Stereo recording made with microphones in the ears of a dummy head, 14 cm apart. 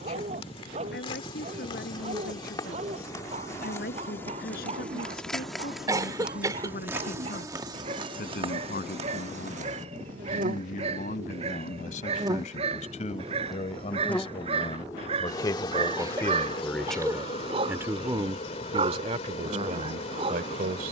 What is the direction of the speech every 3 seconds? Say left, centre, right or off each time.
left, left, left, left, left, centre, right.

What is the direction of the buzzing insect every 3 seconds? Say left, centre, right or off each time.
left, centre, right, right, centre, left, left.